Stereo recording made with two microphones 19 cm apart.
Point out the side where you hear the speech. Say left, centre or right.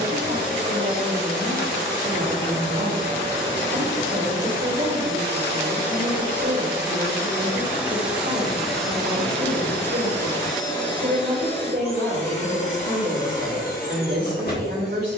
right.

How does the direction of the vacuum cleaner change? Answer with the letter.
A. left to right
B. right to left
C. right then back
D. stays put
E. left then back
B.